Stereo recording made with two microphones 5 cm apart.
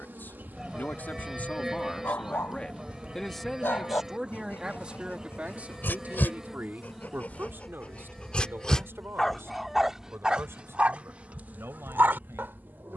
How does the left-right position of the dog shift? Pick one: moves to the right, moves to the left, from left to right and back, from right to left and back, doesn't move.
moves to the right.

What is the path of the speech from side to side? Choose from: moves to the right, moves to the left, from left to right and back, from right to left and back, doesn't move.
moves to the right.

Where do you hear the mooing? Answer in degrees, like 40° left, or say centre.
10° right.